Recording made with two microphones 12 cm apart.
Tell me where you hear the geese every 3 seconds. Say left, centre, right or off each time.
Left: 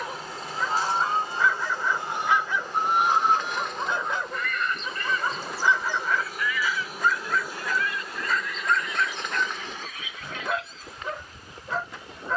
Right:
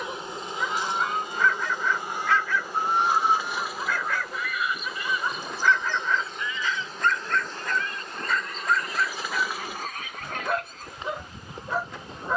left, centre, right, right.